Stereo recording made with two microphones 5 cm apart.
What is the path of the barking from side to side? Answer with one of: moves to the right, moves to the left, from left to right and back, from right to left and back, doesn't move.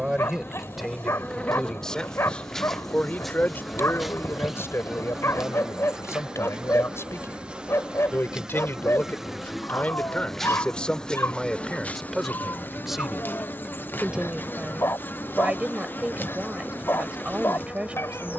doesn't move.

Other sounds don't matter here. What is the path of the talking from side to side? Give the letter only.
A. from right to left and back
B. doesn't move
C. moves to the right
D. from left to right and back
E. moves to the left
A.